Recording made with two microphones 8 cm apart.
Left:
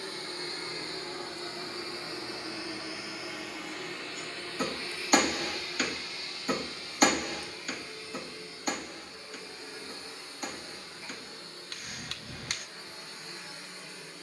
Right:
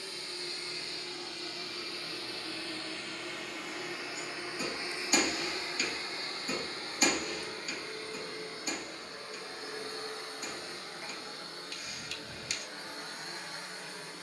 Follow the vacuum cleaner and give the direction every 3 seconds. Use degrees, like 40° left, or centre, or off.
30° left, 10° right, 50° right, 60° right, 70° right.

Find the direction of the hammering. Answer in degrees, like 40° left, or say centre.
60° left.